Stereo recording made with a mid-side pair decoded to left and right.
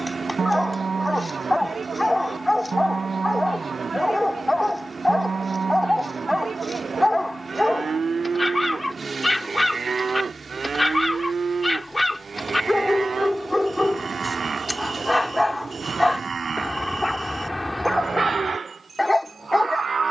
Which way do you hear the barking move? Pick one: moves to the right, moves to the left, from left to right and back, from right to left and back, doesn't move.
doesn't move.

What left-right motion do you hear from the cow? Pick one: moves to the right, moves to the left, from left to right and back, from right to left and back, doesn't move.
doesn't move.